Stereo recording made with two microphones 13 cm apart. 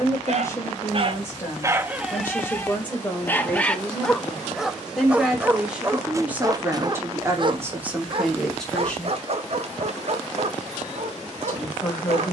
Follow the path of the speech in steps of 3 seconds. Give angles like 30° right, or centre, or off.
20° left, centre, 10° right, 20° left.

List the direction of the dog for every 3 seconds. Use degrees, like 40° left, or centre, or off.
20° right, centre, 40° right, 50° right.